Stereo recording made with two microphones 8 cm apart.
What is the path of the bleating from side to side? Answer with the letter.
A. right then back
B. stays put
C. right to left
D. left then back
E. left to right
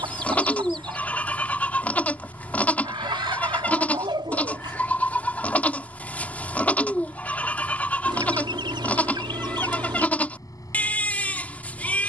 B.